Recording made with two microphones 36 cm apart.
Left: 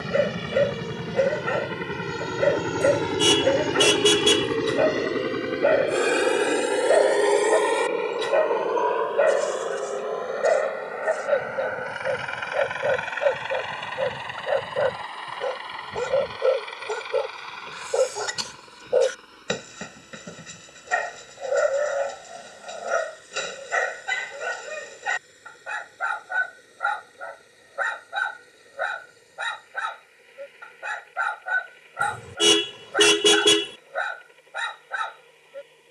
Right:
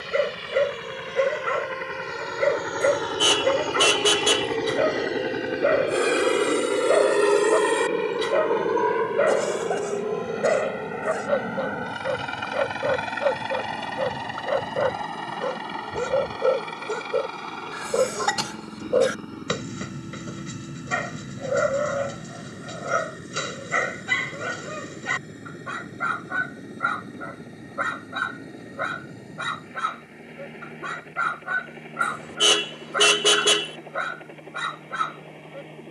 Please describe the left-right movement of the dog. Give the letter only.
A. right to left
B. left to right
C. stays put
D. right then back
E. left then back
C.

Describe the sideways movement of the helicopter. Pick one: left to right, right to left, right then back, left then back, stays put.
left to right.